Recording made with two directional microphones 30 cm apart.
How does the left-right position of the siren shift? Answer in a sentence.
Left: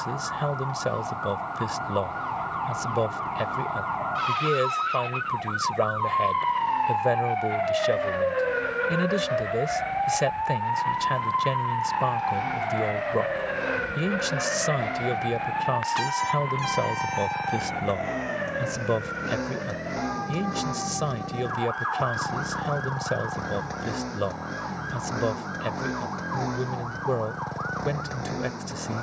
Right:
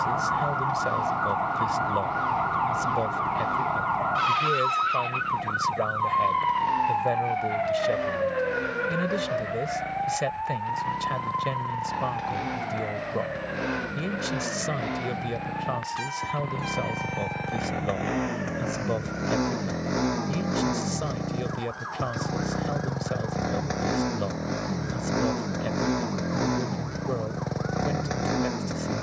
You can hear the siren move to the left.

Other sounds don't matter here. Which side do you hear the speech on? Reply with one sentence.
In this clip you hear the speech on the left.